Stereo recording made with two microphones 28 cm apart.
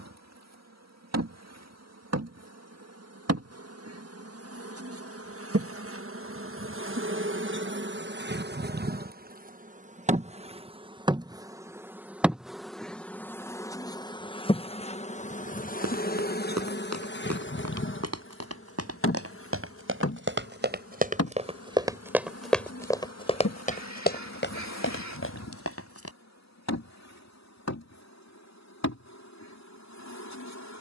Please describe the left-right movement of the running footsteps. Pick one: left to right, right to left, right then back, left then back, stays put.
right to left.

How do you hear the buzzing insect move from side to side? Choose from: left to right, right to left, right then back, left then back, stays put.
right to left.